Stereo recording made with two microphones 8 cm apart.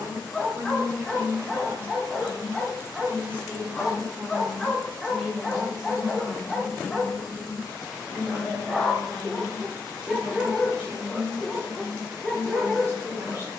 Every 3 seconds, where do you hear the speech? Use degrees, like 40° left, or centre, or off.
40° right, 20° right, centre, 20° right, 30° right.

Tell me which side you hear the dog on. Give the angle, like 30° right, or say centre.
centre.